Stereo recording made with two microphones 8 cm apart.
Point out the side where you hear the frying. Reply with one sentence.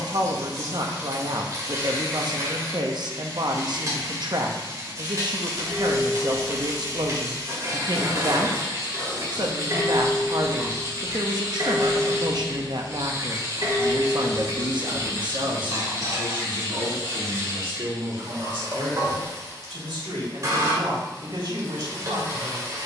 You can hear the frying on the right.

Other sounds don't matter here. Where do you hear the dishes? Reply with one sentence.
In this clip you hear the dishes on the right.